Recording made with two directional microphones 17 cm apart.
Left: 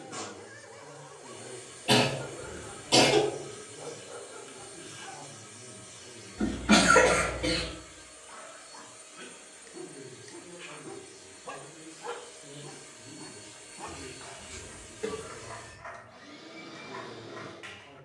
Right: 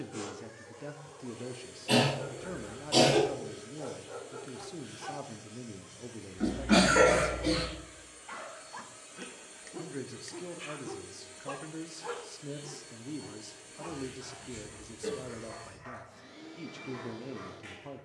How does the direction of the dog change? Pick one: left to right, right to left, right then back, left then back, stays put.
right then back.